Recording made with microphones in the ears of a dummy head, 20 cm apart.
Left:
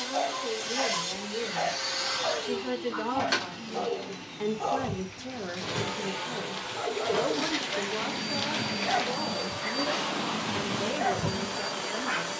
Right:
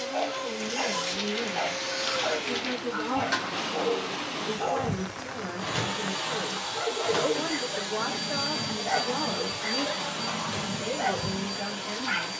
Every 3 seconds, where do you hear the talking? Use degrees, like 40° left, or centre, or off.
30° left, 10° left, 20° right, centre.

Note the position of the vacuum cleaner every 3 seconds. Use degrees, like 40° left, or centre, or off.
10° left, 10° right, 60° right, 40° right.